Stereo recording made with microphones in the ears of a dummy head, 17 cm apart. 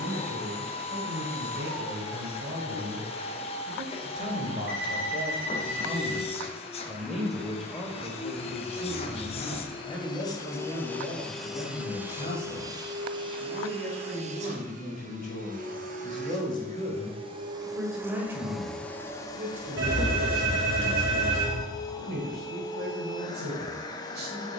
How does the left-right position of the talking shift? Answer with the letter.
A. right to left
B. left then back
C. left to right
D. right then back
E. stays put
B.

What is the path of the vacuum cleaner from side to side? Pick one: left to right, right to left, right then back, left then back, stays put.
right then back.